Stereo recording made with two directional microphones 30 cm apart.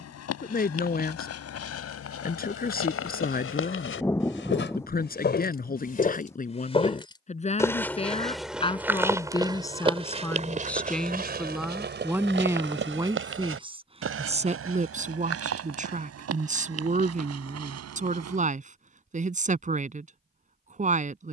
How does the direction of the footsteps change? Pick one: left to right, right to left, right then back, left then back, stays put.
left to right.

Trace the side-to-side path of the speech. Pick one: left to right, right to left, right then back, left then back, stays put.
left to right.